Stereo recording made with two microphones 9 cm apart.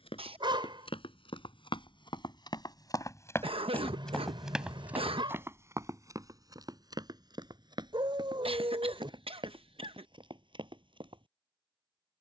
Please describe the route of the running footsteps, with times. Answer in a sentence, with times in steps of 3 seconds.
You can hear the running footsteps on the left from 0 s, in the centre from 3 s and on the right from 6 s.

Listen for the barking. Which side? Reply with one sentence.
You can hear the barking on the right.